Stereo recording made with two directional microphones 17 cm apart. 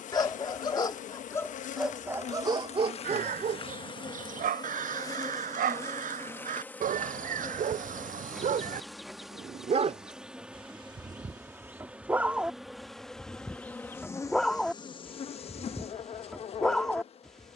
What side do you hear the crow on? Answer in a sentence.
In this clip you hear the crow on the right.